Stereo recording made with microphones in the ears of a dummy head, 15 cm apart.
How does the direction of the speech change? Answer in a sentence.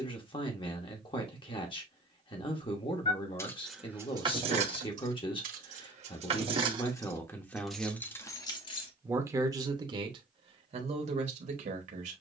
You can hear the speech move to the right.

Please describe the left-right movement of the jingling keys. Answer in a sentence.
In this clip you hear the jingling keys go right and come back.